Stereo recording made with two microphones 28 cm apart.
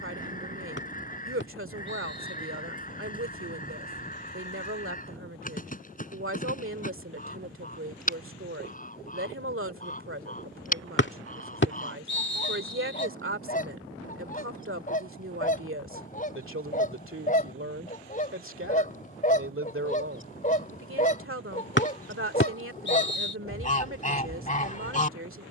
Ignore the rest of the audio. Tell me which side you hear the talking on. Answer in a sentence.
In this clip you hear the talking on the right.